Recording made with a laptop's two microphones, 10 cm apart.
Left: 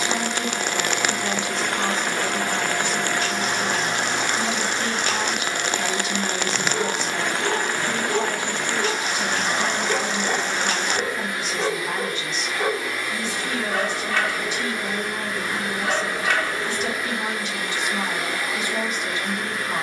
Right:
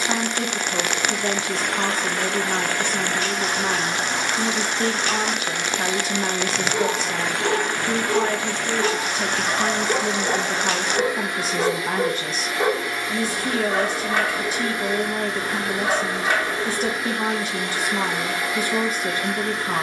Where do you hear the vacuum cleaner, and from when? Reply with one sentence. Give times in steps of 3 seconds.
You can hear the vacuum cleaner on the left from 0 s, in the centre from 9 s and on the right from 12 s.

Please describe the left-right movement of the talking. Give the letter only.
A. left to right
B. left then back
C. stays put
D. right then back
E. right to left
C.